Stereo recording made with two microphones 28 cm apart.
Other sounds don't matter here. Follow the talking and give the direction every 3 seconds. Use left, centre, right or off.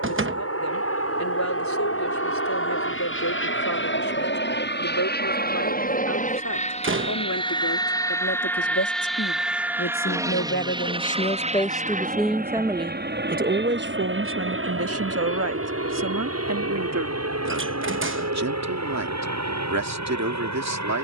left, left, left, left, right, right, right.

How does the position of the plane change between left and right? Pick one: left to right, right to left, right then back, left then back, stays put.
left to right.